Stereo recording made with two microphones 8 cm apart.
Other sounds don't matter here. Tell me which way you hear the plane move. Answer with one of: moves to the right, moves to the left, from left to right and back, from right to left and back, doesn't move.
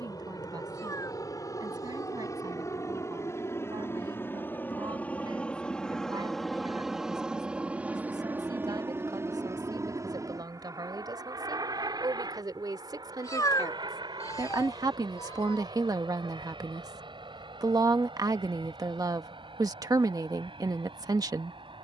moves to the right.